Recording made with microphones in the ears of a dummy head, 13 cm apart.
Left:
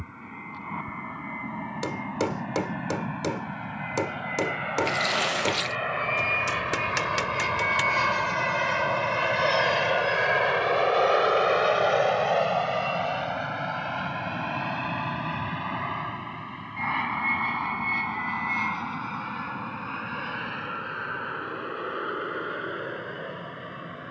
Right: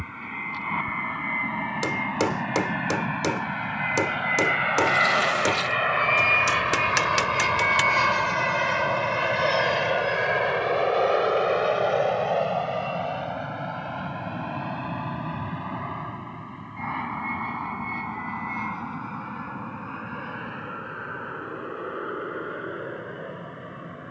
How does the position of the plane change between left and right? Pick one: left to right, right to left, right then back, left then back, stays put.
right to left.